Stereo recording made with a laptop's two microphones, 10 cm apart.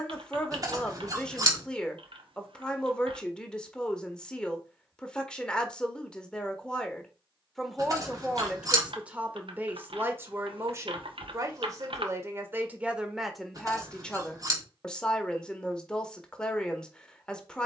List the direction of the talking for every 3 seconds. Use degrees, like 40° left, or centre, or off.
10° left, 10° left, centre, 30° right, centre, 10° left.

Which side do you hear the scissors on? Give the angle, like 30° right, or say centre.
40° right.